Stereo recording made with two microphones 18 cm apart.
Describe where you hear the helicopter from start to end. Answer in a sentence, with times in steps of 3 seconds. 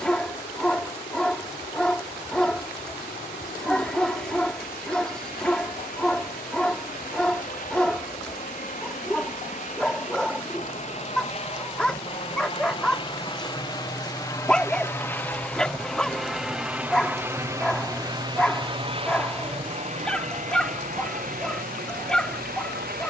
You can hear the helicopter on the left from 0 s, in the centre from 15 s and on the right from 18 s.